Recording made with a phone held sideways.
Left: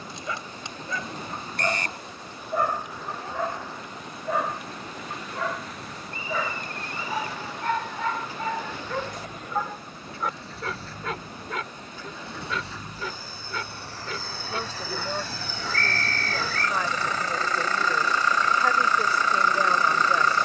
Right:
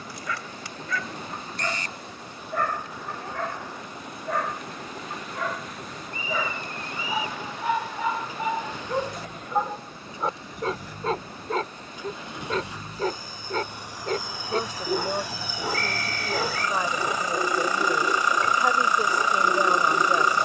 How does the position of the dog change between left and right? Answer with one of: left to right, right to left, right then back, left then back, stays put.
left to right.